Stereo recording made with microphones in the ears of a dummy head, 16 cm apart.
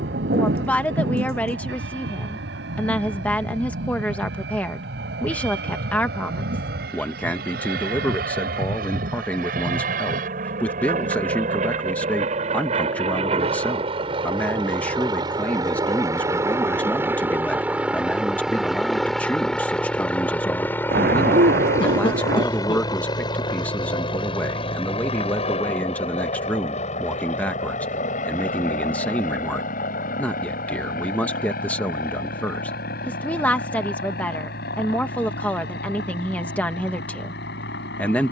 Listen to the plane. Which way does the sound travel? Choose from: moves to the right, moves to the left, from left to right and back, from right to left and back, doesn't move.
moves to the left.